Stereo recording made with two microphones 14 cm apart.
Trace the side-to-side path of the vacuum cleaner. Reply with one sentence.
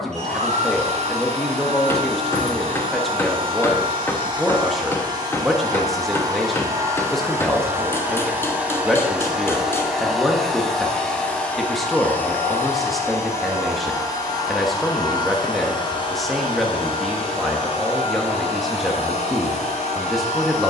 In this clip you hear the vacuum cleaner go from the right side to the left.